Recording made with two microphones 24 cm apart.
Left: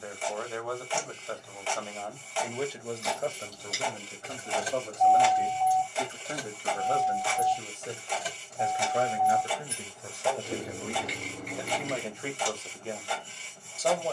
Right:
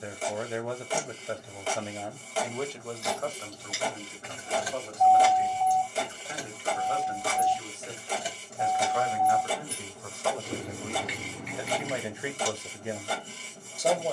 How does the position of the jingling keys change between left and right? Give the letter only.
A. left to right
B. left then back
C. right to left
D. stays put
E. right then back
E.